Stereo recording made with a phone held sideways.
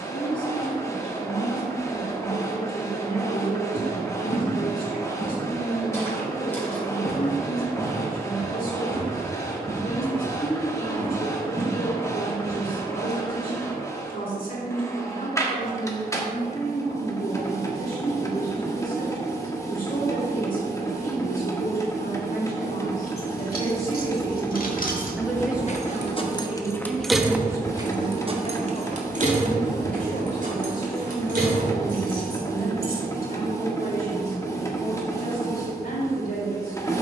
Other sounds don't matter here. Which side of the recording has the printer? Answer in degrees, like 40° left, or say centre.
20° left.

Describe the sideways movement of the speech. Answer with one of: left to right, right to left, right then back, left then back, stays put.
right then back.